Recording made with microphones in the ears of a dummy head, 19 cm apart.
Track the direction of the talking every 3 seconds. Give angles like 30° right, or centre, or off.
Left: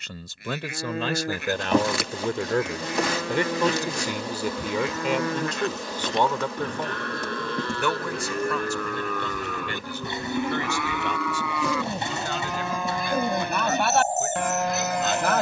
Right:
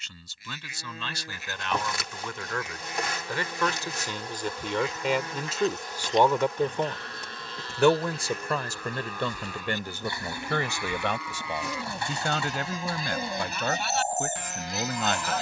40° left, 10° left, 20° right, 40° right, 50° right.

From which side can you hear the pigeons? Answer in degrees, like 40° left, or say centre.
20° left.